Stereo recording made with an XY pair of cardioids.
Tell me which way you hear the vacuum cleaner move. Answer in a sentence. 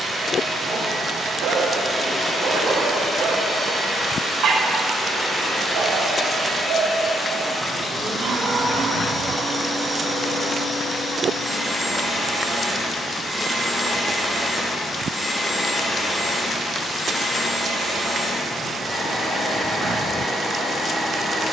In this clip you hear the vacuum cleaner go right and come back.